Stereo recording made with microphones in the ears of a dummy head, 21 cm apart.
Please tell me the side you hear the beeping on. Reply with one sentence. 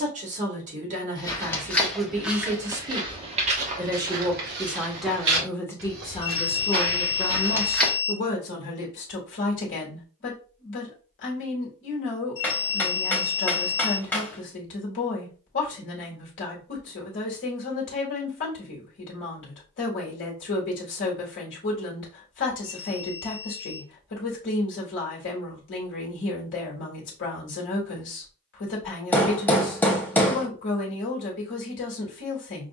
In this clip you hear the beeping on the left.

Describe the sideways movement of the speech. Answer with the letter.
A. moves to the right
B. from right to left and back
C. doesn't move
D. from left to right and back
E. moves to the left
E.